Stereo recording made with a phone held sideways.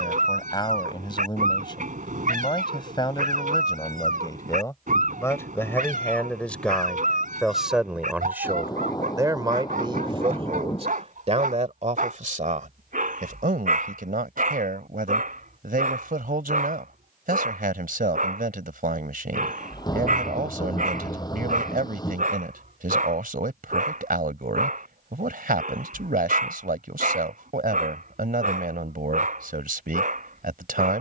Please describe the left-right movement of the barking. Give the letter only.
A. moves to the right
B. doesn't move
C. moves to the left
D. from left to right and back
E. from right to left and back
B.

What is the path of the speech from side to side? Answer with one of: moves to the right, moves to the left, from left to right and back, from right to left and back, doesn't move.
moves to the right.